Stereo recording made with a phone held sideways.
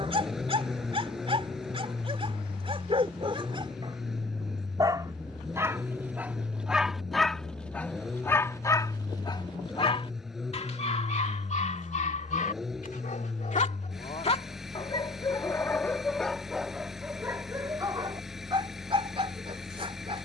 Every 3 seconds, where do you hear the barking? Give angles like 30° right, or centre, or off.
40° right, 30° right, 10° left, 40° left, 50° left, centre, 40° right.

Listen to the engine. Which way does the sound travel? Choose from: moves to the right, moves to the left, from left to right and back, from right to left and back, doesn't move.
doesn't move.